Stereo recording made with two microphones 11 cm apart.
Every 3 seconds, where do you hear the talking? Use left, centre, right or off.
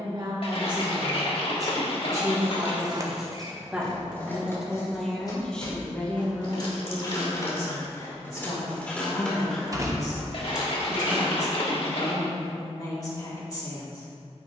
right, centre, left, left, left.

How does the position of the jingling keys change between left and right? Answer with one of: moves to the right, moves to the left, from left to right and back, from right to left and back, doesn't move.
from right to left and back.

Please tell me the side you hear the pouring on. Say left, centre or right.
left.